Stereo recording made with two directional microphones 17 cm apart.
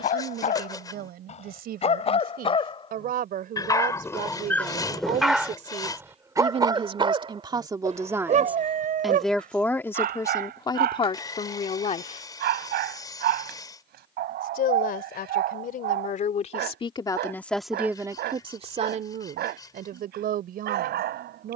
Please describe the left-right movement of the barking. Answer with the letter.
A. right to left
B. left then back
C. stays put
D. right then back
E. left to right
E.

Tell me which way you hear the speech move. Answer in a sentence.
You can hear the speech go left and come back.